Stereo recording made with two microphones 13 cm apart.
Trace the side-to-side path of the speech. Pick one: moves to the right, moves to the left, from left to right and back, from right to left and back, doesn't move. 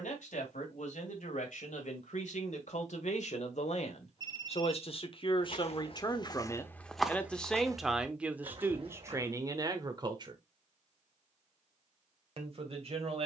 moves to the right.